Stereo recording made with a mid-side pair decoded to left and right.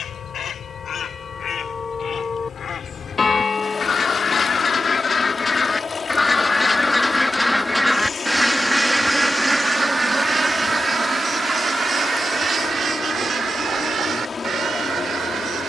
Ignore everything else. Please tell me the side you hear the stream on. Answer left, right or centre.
left.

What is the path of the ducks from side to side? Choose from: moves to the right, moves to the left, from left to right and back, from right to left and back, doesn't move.
moves to the right.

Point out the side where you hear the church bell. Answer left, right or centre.
left.